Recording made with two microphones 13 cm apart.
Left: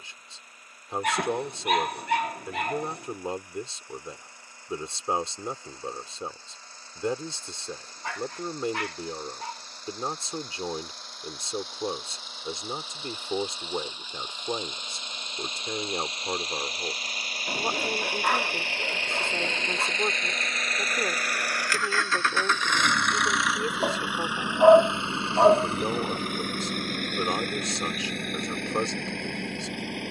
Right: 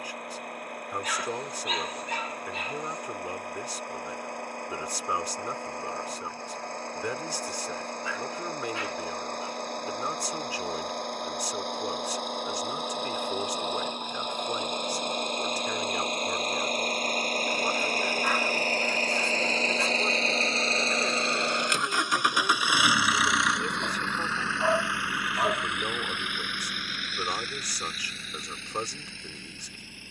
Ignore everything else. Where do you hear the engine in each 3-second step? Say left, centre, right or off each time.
right, right, right, right, right, right, right, centre, left, left.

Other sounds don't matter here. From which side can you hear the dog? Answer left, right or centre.
left.